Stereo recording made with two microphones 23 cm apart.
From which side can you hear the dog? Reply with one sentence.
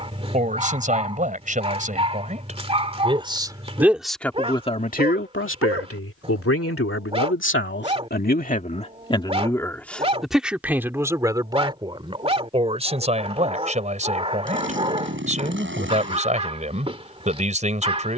You can hear the dog on the right.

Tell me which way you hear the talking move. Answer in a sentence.
You can hear the talking move from right to left and back again.